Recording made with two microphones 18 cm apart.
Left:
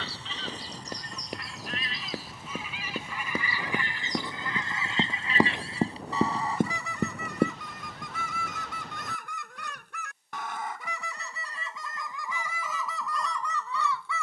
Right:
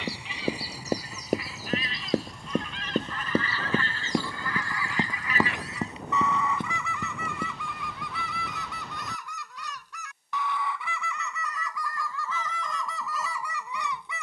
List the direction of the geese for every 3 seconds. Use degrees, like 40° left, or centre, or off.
centre, 20° left, 40° left, 40° left, centre.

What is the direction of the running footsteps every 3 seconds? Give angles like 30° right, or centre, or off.
50° right, 10° right, 50° left, off, off.